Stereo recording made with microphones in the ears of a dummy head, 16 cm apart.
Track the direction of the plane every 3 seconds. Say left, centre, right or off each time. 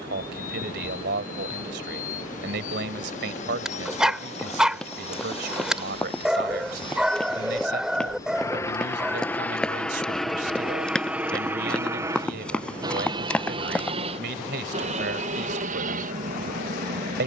left, left, left, centre, right, right.